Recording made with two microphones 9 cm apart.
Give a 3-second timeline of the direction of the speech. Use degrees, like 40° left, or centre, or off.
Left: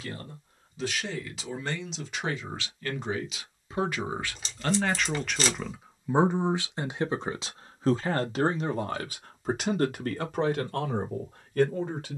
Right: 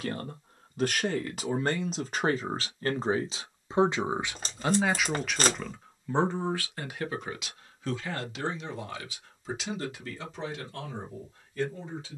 50° right, 10° right, 30° left, 60° left.